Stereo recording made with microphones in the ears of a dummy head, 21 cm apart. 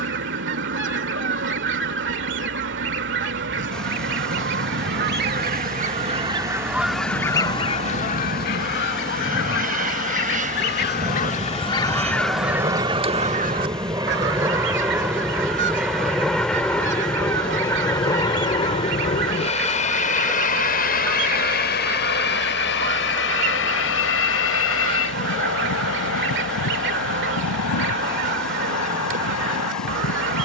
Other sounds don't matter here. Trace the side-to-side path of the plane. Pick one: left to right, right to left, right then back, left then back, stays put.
right to left.